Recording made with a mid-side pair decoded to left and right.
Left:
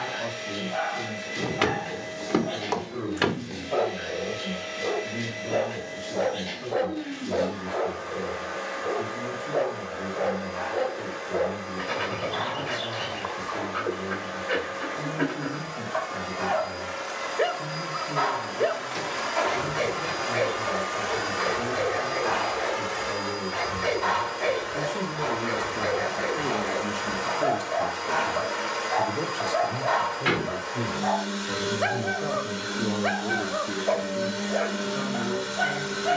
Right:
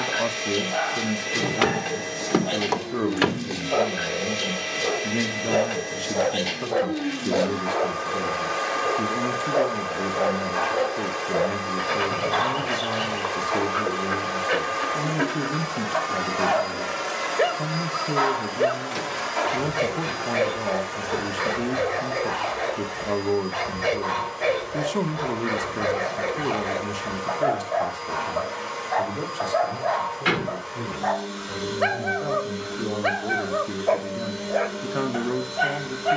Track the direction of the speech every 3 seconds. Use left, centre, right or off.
right, right, right, right, right, right, right, right, right, centre, centre, right.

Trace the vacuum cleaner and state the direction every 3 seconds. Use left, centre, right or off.
right, right, right, right, right, right, centre, left, left, left, left, left.